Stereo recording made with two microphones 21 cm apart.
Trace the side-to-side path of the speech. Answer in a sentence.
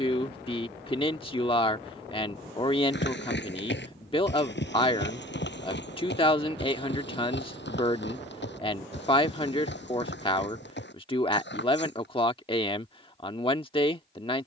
You can hear the speech stay put.